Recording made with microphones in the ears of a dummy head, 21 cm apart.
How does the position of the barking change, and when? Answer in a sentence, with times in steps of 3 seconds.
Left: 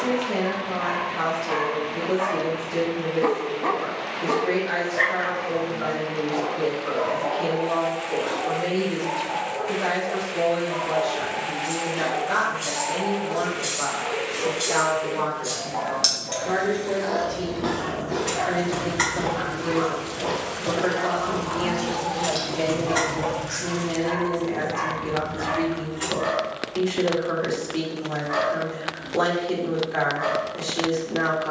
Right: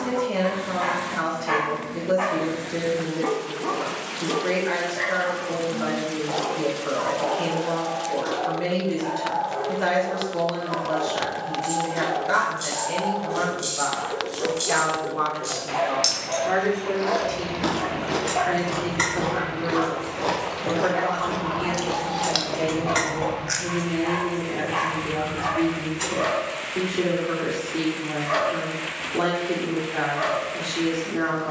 You can hear the barking on the right from 0 s, on the left from 3 s and on the right from 6 s.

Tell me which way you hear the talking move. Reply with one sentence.
In this clip you hear the talking travel towards the left.